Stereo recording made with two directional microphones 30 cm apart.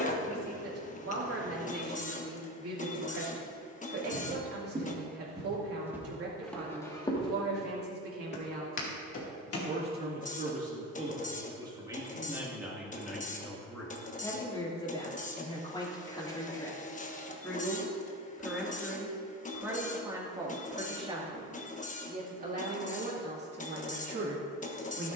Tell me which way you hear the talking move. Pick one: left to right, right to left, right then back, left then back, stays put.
left then back.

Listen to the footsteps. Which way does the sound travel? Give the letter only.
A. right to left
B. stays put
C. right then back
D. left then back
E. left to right
A.